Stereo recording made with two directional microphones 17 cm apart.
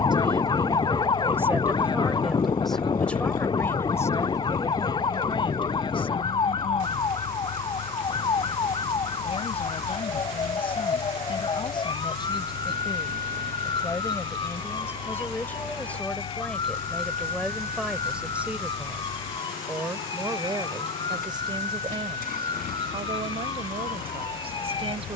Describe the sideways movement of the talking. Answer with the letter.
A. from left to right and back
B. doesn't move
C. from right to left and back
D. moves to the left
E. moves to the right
C.